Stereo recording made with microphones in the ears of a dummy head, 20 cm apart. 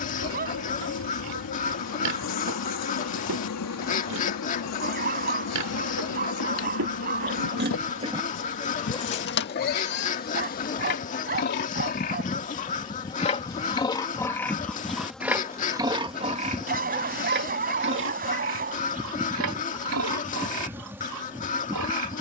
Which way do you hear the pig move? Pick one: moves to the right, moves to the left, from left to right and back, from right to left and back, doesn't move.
from right to left and back.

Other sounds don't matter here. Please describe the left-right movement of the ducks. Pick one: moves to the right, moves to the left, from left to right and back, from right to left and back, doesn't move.
doesn't move.